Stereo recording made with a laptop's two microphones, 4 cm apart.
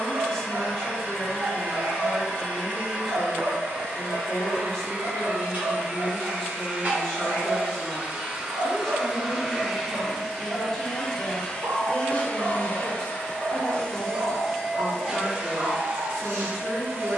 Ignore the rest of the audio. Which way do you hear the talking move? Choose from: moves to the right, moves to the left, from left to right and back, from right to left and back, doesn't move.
doesn't move.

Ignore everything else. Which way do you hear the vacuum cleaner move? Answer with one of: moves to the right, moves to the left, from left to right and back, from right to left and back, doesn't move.
from right to left and back.